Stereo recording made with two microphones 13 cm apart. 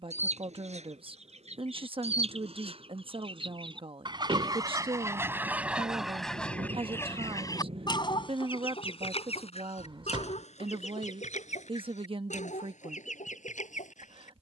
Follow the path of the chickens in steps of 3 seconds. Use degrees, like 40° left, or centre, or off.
60° right, 30° right, 30° left, 60° left, 70° left.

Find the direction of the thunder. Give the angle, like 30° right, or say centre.
50° right.